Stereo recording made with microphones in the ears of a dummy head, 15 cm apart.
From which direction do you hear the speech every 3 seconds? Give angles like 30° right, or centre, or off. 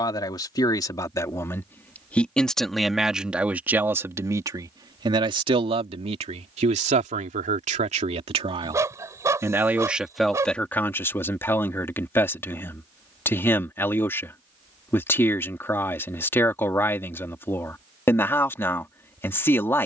10° left, 20° right, 40° right, centre, 10° left, 10° left, 10° left.